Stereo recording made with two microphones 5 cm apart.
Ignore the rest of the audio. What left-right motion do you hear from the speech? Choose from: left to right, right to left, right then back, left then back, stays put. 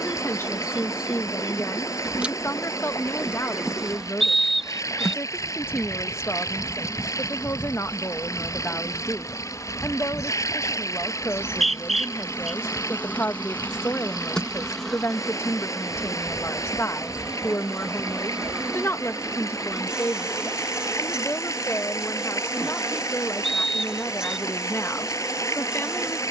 stays put.